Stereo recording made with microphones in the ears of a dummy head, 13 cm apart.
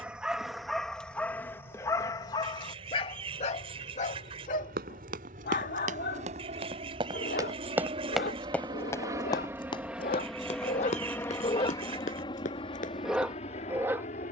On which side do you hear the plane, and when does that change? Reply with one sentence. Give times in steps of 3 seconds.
You can hear the plane on the right from 0 s, in the centre from 9 s and on the left from 12 s.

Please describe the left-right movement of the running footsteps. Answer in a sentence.
In this clip you hear the running footsteps move from right to left.